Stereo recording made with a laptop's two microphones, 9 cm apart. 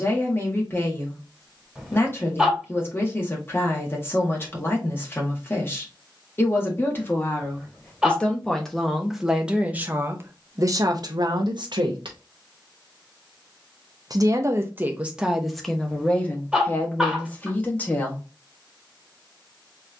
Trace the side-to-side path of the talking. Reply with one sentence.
You can hear the talking move from left to right and back again.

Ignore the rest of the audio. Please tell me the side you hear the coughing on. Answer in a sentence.
In this clip you hear the coughing in the centre.